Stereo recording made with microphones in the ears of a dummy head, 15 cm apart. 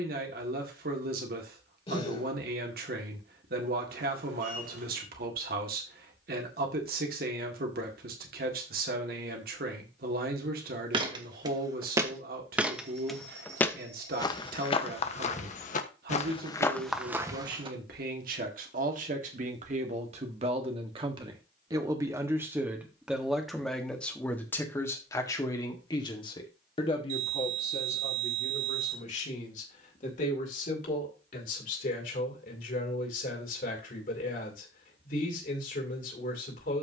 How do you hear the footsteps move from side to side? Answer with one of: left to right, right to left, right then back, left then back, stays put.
left then back.